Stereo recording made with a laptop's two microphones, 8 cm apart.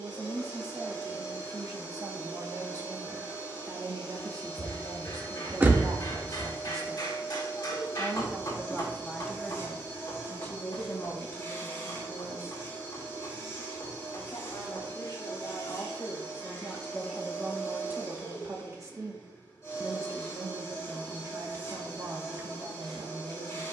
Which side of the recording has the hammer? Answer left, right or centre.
left.